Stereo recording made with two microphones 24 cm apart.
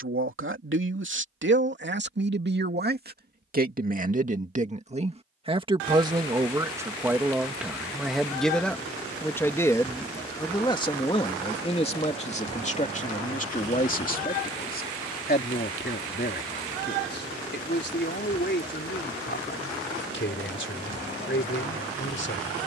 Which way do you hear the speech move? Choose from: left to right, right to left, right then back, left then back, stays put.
right to left.